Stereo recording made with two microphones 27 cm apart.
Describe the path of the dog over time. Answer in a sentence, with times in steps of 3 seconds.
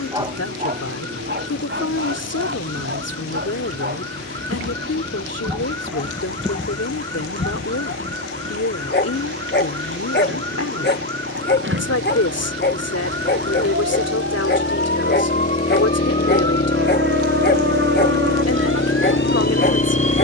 You can hear the dog on the right from 0 s and on the left from 6 s.